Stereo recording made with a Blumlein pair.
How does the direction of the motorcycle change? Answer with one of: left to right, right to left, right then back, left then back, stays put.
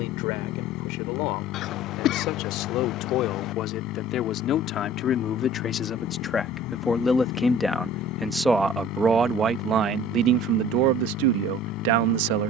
stays put.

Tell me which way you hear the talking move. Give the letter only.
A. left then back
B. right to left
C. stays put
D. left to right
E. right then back
D.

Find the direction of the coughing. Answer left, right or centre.
left.